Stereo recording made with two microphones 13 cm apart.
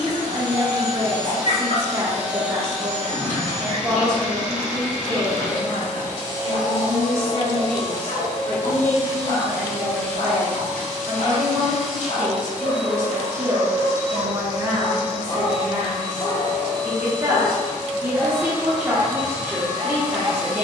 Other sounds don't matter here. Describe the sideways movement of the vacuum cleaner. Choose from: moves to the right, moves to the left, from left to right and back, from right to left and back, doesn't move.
from right to left and back.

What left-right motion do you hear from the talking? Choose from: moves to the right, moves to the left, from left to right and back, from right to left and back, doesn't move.
from right to left and back.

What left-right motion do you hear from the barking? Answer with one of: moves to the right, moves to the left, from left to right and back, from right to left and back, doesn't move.
moves to the right.